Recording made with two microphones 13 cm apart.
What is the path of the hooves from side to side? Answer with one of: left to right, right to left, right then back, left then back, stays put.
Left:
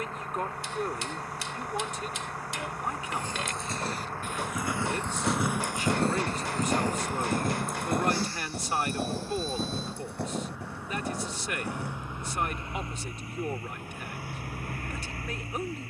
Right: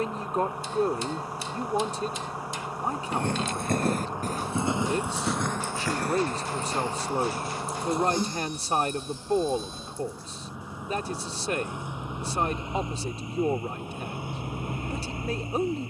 right to left.